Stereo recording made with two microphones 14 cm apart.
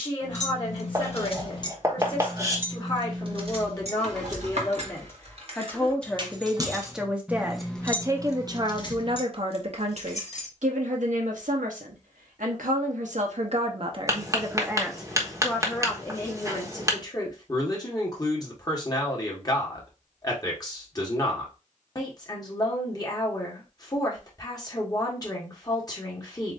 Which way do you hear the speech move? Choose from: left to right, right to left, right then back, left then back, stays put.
right then back.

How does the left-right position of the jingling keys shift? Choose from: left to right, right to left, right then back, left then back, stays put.
right then back.